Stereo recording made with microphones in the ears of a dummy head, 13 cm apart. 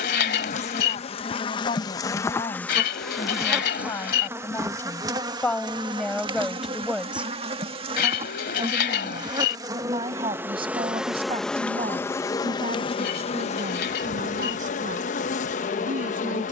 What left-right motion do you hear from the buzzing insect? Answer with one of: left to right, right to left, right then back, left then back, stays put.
right then back.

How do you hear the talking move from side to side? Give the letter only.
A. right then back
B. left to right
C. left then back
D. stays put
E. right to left
B.